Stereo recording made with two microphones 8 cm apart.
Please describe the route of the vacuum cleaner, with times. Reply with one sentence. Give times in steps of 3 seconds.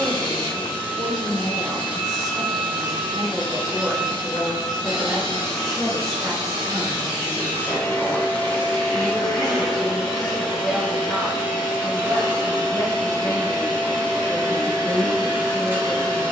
You can hear the vacuum cleaner on the left from 0 s, in the centre from 9 s and on the right from 12 s.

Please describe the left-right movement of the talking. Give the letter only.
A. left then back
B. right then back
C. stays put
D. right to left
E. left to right
D.